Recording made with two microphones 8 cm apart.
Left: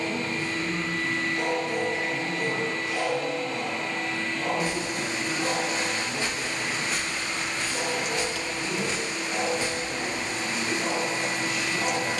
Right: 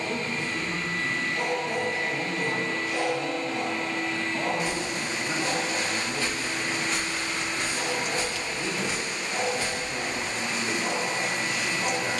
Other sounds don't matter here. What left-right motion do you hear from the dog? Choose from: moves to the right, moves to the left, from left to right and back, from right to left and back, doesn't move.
moves to the left.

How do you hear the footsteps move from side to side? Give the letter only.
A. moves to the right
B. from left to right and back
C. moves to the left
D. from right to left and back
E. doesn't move
B.